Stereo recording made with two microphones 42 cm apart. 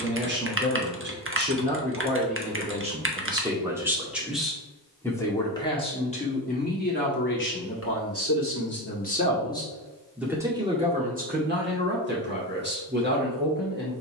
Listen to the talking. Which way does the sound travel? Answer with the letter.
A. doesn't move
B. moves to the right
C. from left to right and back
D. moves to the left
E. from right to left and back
E.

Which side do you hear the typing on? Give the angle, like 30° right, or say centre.
30° right.